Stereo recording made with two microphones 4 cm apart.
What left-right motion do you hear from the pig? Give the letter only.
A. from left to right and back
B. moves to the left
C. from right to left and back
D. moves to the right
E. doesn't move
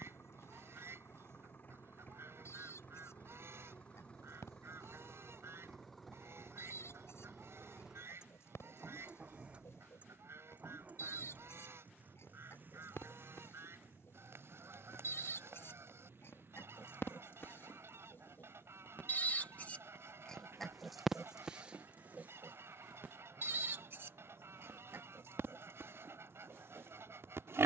D.